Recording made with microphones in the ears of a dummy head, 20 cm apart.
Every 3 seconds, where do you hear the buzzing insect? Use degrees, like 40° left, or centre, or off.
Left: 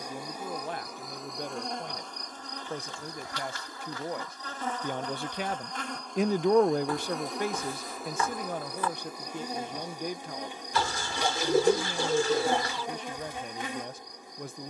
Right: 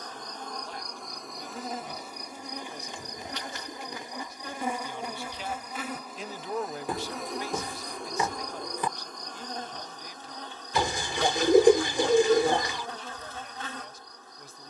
centre, 10° right, centre, 10° left, 10° left.